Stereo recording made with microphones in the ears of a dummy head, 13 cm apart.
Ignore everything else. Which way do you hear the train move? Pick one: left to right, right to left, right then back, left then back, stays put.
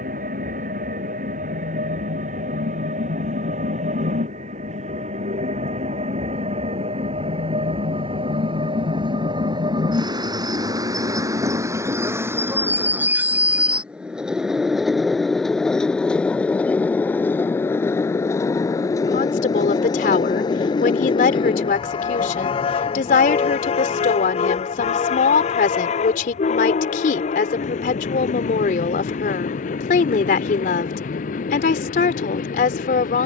right to left.